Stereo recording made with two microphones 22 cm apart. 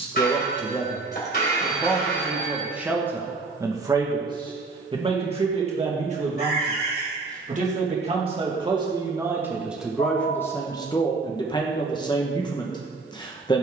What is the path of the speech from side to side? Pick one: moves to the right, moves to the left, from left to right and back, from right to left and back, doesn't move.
from left to right and back.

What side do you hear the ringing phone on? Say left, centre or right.
left.